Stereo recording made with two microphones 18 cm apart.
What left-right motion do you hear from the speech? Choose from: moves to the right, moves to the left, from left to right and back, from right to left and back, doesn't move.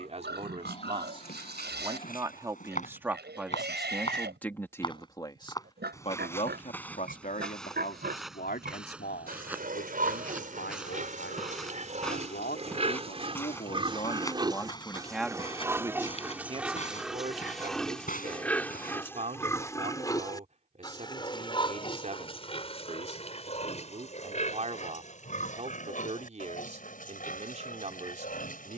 from right to left and back.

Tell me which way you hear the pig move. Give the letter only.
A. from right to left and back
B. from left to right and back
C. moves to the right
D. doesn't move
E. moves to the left
E.